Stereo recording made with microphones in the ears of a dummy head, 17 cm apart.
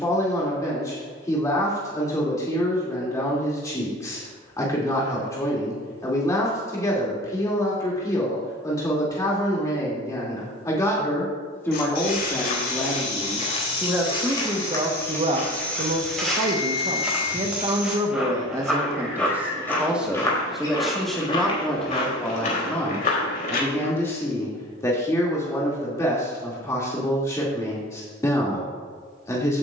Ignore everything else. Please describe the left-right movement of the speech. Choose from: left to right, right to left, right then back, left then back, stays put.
right then back.